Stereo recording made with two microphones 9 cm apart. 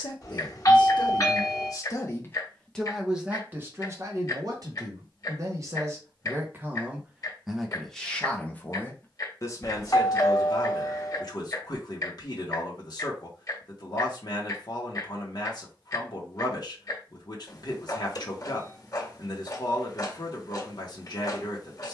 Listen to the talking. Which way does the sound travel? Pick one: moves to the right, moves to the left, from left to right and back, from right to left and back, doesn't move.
from left to right and back.